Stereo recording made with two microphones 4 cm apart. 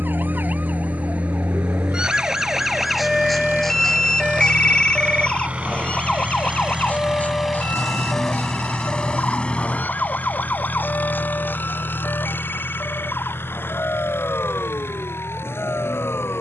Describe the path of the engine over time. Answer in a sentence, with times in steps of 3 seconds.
You can hear the engine on the right from 0 s, in the centre from 6 s and on the left from 9 s.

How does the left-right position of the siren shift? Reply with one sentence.
You can hear the siren go from the right side to the left.